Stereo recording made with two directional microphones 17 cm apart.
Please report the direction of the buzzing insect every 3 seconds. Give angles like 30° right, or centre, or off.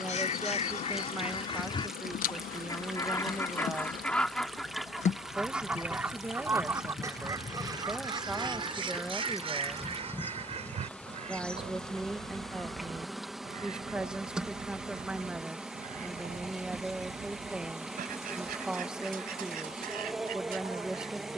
60° left, 50° left, 30° left, 10° left, centre, 10° right, 10° right.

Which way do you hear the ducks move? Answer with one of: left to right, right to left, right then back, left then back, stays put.
left to right.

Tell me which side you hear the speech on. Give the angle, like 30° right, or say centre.
10° right.